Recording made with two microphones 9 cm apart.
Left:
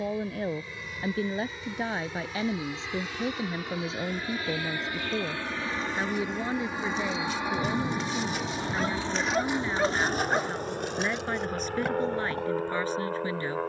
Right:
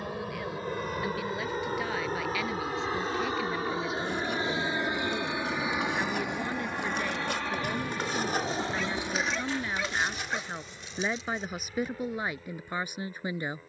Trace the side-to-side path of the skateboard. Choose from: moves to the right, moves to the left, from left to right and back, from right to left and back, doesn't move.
moves to the left.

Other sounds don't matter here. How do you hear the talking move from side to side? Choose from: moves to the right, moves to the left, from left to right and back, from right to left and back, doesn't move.
moves to the right.